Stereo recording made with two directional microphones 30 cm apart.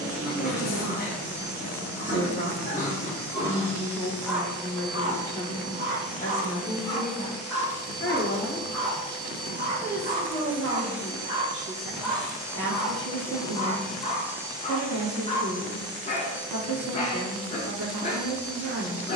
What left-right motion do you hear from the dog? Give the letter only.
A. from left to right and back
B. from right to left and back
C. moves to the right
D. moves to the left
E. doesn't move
A.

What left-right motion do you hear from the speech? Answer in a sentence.
You can hear the speech move from right to left and back again.